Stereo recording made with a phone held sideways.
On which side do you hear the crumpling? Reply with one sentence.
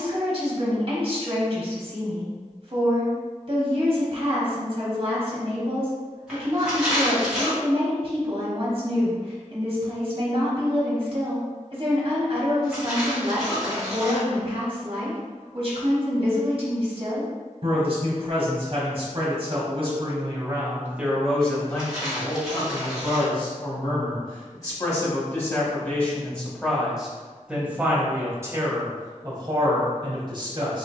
You can hear the crumpling in the centre.